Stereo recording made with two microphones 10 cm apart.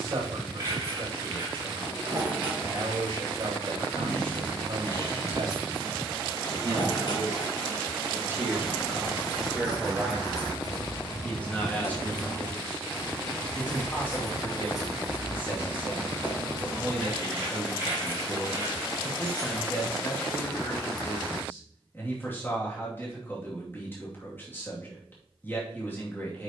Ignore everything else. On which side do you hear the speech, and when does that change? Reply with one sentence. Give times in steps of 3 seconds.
You can hear the speech on the right from 0 s, in the centre from 9 s and on the left from 12 s.